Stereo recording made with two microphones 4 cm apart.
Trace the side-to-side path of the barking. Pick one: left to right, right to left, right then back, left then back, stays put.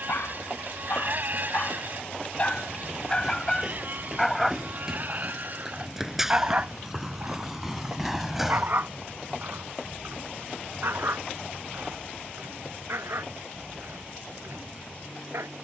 left to right.